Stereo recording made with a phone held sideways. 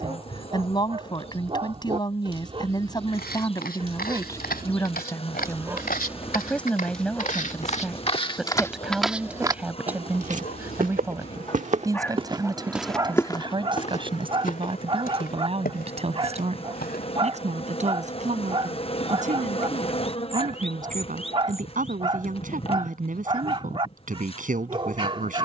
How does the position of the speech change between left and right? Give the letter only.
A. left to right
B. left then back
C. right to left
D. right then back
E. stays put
A.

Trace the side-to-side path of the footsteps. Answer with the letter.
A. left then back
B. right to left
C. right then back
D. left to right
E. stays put
C.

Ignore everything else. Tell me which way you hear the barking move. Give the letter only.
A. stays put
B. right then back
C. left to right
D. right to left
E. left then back
E.